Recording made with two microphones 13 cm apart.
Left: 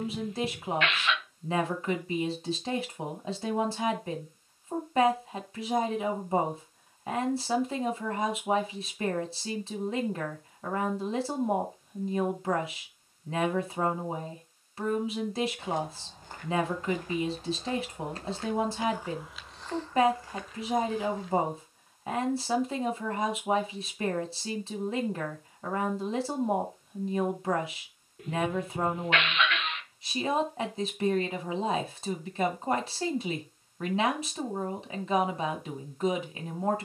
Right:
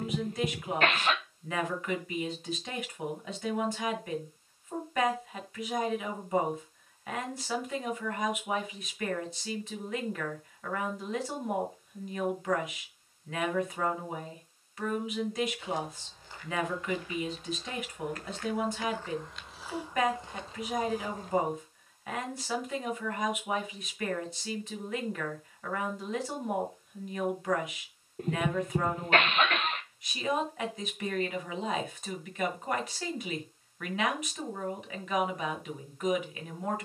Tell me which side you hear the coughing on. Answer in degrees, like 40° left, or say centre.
40° right.